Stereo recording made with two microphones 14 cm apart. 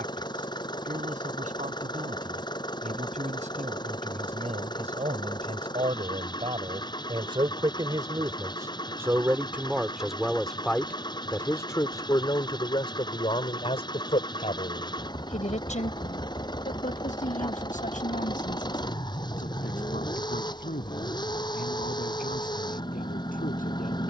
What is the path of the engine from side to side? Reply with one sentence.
You can hear the engine stay in one place.